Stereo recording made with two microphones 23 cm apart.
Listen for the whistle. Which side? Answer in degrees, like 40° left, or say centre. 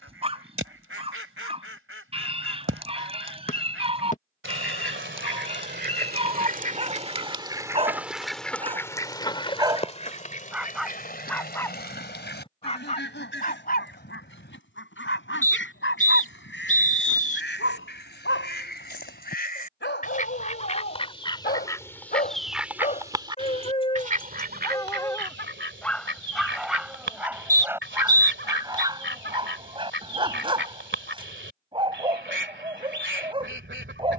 30° left.